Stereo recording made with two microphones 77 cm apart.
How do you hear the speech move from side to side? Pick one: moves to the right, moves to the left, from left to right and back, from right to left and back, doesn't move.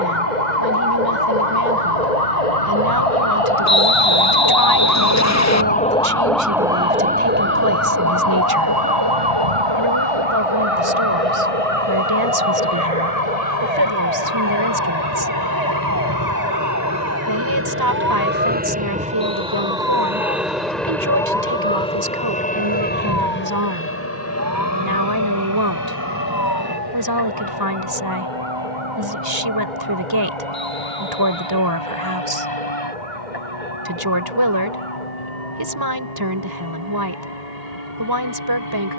doesn't move.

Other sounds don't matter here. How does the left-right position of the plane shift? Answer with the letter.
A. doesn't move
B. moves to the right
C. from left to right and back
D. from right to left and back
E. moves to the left
E.